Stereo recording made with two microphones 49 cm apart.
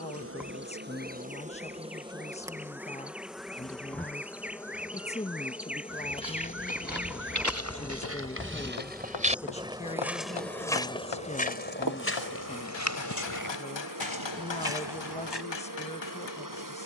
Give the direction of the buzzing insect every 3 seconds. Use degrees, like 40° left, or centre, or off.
10° right, centre, 10° left, 20° right, 40° right, 40° right.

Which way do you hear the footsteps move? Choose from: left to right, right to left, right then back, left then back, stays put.
right to left.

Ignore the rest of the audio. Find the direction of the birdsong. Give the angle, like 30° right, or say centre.
centre.